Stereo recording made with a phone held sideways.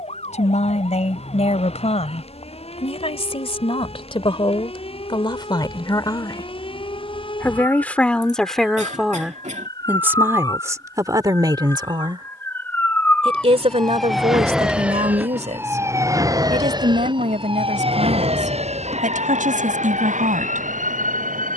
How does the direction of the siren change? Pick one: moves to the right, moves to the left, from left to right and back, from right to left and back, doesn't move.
moves to the right.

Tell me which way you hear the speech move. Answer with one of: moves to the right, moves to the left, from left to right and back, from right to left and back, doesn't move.
moves to the right.